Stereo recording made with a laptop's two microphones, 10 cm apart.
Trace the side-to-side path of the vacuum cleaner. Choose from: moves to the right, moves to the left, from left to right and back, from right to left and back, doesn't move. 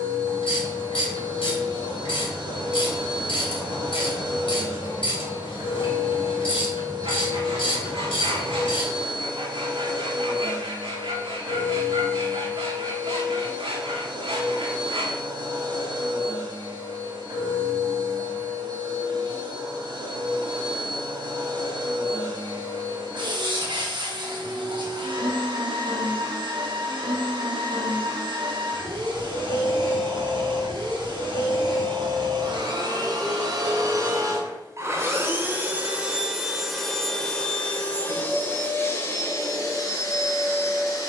moves to the left.